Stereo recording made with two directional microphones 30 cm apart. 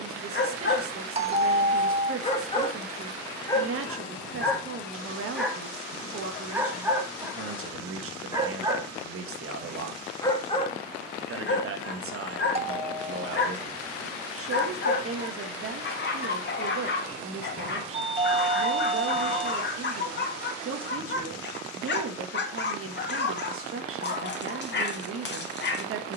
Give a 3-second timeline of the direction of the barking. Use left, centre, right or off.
left, centre, centre, left, left, left, left, left, left.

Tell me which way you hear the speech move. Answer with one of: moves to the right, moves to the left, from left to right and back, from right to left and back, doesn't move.
doesn't move.